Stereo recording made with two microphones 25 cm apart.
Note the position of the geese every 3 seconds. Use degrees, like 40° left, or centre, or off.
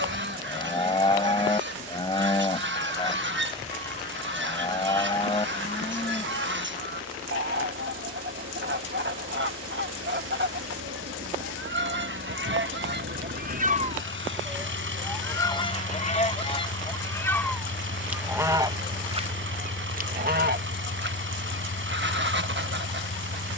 50° right, 50° right, 50° right, 50° right, 40° right, 20° left, 30° right, 50° right.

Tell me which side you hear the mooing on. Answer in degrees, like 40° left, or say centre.
20° left.